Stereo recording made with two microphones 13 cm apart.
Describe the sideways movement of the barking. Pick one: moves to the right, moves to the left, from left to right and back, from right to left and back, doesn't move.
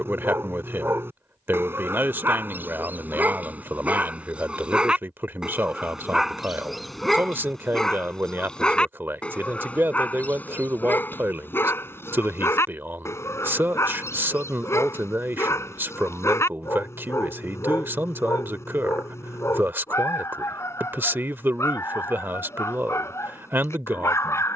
moves to the left.